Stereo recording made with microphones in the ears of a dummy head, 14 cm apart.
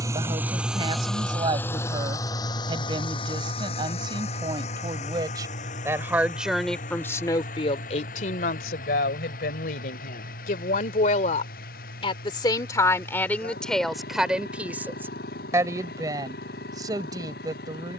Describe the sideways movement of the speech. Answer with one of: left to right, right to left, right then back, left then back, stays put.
left then back.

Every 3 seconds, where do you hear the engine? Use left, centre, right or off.
centre, left, left, left, left, left.